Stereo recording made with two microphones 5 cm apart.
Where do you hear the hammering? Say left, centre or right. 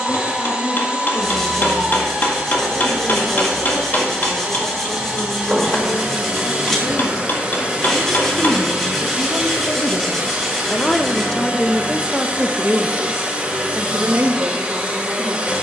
left.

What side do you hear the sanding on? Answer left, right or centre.
centre.